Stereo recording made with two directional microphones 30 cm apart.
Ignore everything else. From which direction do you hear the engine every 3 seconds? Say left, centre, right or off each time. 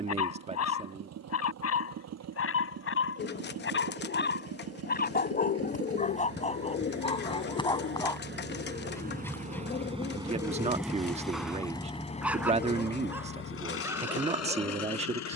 right, right, right, centre, left.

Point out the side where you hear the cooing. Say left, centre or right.
left.